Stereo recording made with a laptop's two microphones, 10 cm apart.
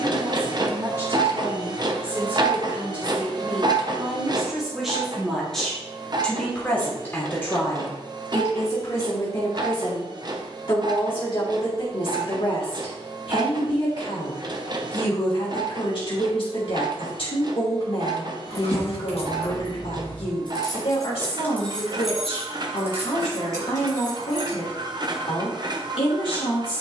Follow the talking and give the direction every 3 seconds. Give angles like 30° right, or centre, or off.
20° right, 10° right, 20° left, 40° left, 60° left, 60° left, 60° left, 60° left, 60° left.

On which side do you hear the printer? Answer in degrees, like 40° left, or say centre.
40° right.